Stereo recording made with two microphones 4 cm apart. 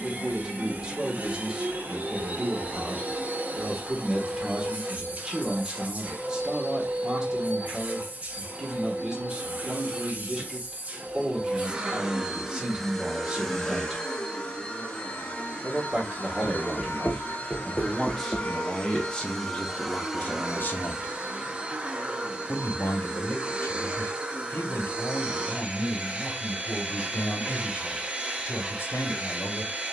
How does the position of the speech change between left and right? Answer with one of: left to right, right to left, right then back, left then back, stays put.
right to left.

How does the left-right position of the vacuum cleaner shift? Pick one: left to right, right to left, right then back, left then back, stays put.
left then back.